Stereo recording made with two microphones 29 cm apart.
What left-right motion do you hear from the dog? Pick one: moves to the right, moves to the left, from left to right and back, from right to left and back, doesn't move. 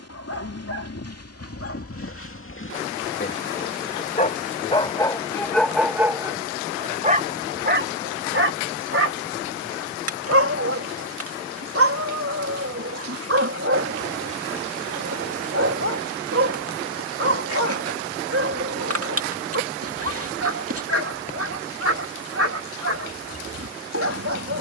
moves to the right.